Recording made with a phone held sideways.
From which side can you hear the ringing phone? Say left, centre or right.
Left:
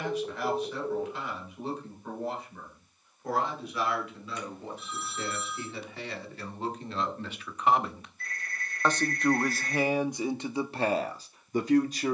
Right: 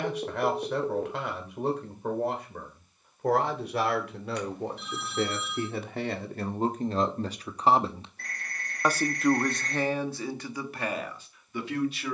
right.